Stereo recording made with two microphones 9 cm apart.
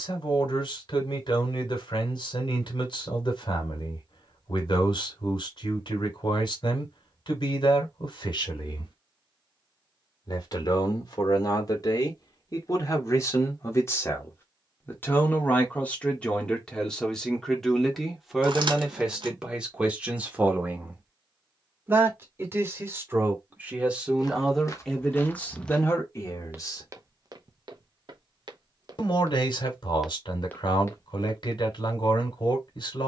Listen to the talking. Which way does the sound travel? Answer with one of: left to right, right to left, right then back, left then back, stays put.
right then back.